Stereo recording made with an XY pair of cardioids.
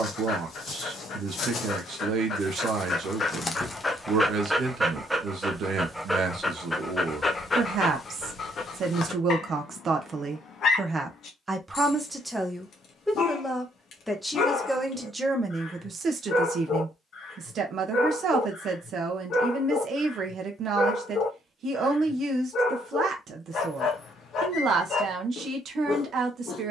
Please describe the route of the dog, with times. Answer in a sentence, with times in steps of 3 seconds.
In this clip you hear the dog on the left from 0 s, in the centre from 3 s and on the left from 6 s.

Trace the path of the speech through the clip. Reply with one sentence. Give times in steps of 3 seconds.
You can hear the speech on the right from 0 s, in the centre from 12 s and on the right from 15 s.